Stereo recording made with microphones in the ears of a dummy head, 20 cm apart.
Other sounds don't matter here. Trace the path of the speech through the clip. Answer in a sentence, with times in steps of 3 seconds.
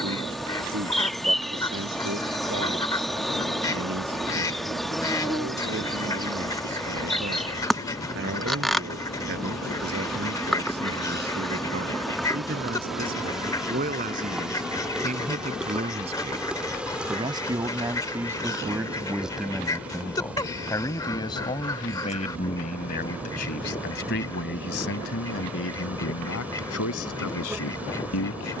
In this clip you hear the speech on the right from 0 s, in the centre from 18 s and on the left from 21 s.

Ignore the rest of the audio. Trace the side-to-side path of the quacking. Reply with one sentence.
In this clip you hear the quacking stay in one place.